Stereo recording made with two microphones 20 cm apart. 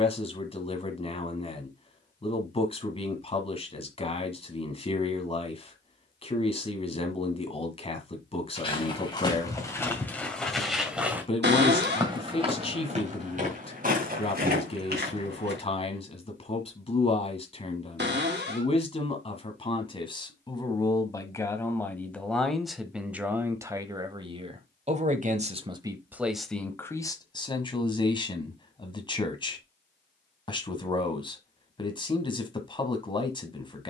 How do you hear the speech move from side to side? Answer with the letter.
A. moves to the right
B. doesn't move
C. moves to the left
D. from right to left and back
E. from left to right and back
E.